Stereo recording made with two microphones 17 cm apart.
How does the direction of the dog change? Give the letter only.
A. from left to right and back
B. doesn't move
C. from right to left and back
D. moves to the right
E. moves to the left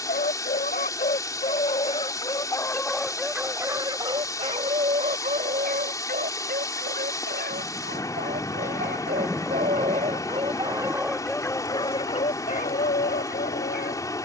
A.